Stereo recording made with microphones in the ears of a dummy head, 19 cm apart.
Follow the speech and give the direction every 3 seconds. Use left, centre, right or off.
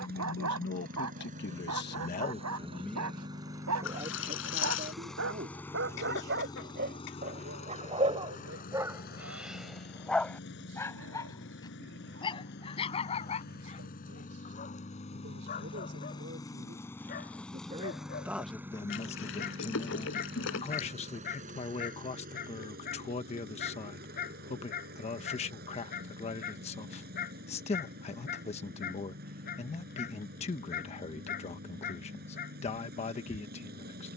left, right, right, right, right, right, left, left, left, left, left, left.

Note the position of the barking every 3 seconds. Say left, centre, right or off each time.
right, right, right, centre, left, left, left, left, left, left, left, off.